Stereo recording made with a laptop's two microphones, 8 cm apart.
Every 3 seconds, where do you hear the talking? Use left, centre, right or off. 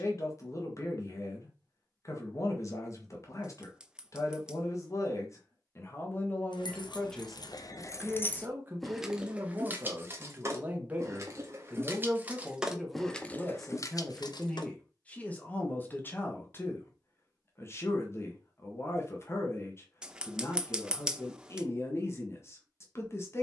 left, left, centre, right, centre, left, left, left.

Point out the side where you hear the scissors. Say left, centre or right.
centre.